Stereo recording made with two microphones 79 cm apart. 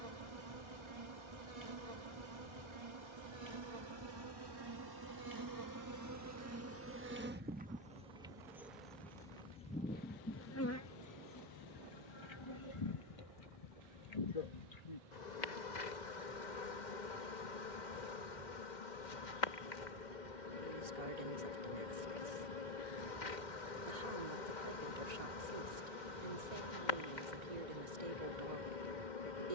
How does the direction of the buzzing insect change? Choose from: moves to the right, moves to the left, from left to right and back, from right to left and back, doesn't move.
moves to the left.